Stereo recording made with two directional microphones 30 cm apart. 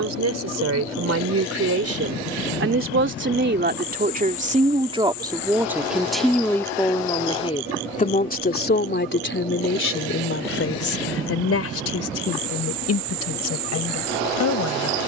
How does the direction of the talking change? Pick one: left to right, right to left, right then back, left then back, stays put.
right to left.